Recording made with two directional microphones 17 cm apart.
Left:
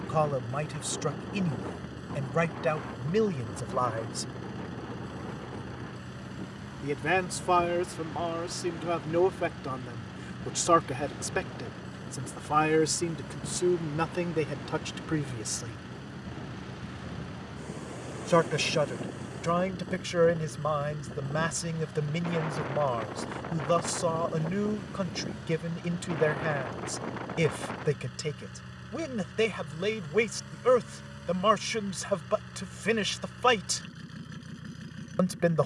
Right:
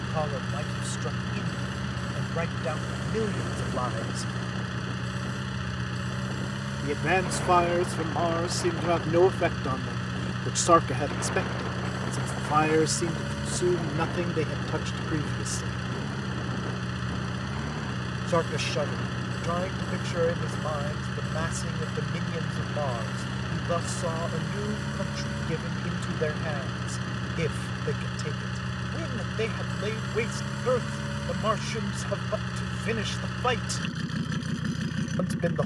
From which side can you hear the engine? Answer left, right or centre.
right.